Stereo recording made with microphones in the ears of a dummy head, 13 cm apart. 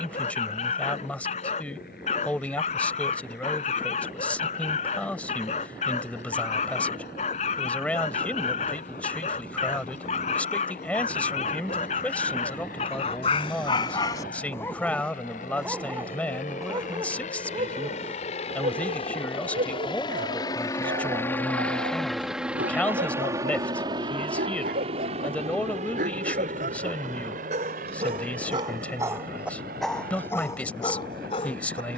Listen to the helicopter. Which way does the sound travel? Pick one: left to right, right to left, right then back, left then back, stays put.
left to right.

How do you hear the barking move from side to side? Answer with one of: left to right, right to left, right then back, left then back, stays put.
right then back.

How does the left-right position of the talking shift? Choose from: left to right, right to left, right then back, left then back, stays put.
stays put.